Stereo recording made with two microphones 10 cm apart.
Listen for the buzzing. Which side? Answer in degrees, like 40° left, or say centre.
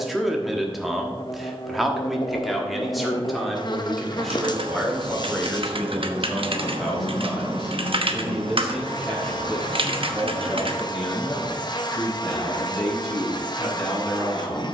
50° left.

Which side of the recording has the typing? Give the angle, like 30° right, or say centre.
70° right.